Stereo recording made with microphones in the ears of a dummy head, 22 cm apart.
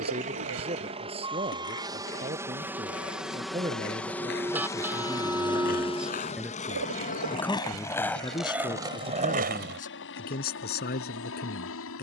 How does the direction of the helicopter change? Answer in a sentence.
You can hear the helicopter move to the left.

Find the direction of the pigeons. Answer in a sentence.
You can hear the pigeons on the right.